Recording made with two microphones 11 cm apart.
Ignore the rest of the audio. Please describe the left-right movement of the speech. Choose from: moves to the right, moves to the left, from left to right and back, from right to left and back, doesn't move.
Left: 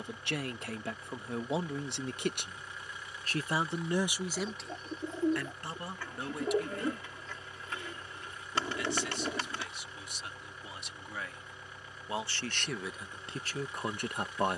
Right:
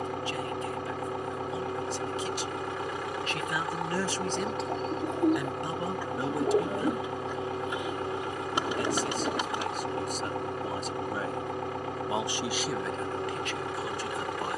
from left to right and back.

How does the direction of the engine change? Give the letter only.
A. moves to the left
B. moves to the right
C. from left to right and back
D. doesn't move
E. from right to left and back
D.